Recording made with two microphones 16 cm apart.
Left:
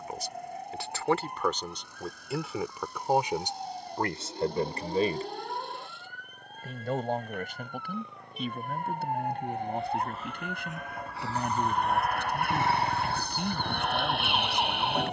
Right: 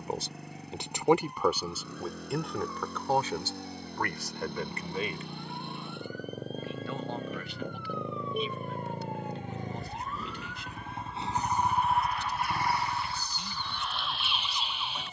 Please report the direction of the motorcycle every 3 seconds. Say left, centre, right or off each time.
right, right, right, right, left.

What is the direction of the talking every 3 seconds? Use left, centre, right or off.
centre, left, left, left, left.